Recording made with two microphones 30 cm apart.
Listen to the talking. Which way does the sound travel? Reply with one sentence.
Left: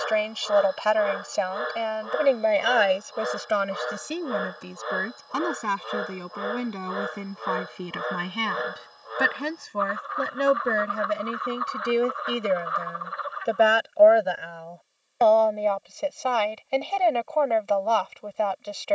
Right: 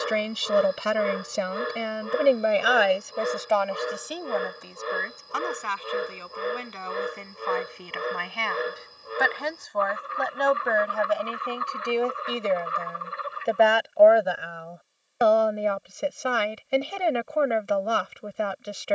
In this clip you hear the talking move from right to left and back again.